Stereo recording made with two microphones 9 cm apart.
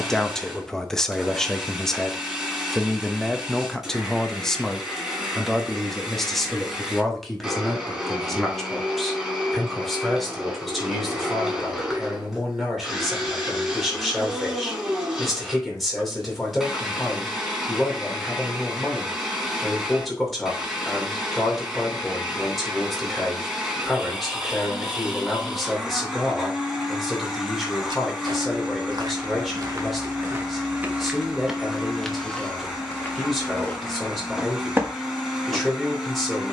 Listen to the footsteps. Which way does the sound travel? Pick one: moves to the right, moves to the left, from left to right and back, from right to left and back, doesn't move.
from right to left and back.